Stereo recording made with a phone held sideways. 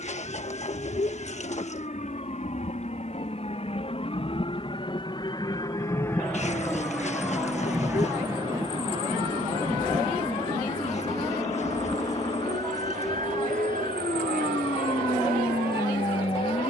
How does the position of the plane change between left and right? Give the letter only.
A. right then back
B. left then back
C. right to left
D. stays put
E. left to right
E.